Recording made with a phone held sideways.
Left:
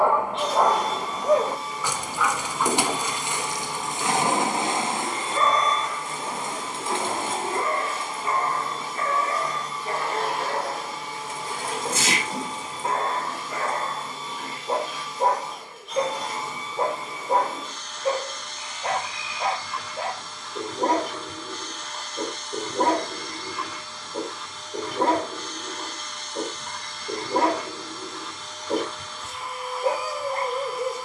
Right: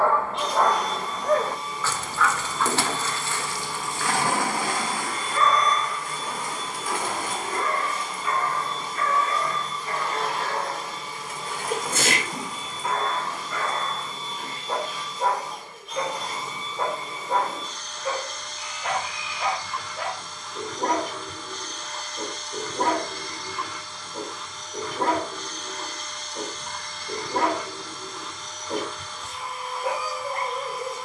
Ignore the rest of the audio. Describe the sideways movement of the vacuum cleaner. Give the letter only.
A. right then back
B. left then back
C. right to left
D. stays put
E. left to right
D.